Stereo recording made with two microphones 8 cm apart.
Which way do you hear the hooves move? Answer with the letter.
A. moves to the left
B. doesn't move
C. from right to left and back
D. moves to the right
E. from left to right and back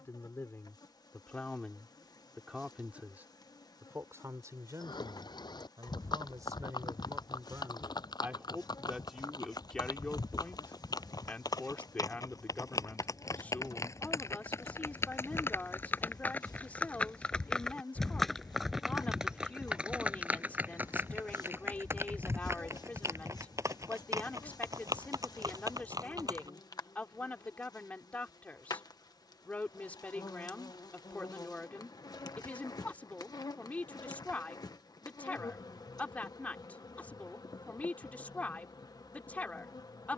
D.